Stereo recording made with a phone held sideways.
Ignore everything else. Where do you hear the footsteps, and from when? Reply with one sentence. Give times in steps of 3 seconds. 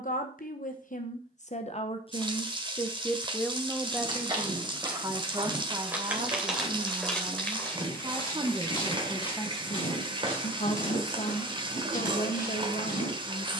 You can hear the footsteps not at all from 0 s, on the right from 3 s, in the centre from 6 s and on the left from 9 s.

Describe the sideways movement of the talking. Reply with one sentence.
You can hear the talking go right and come back.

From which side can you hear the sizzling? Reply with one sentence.
In this clip you hear the sizzling on the right.